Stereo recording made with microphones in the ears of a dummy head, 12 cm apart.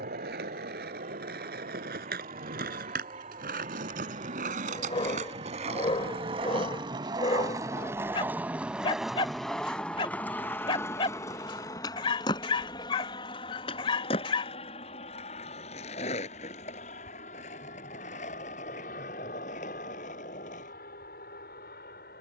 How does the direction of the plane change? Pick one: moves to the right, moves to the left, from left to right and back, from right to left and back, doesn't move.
moves to the left.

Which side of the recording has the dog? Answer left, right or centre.
left.